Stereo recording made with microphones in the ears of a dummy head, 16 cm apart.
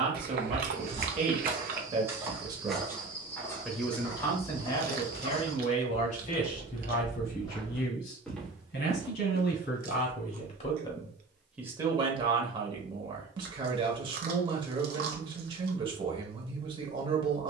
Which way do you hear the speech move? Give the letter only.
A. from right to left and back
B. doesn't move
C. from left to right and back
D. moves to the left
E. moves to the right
A.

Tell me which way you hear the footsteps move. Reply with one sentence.
You can hear the footsteps move from right to left and back again.